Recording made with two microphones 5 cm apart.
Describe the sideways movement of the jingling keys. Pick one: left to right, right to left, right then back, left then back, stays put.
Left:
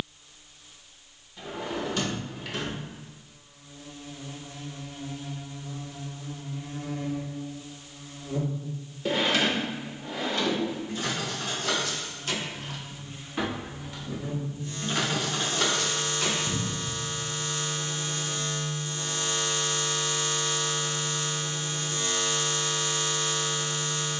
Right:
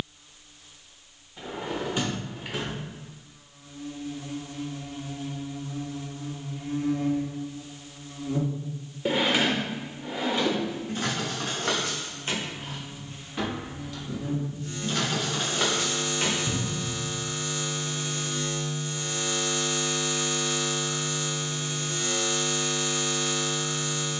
left then back.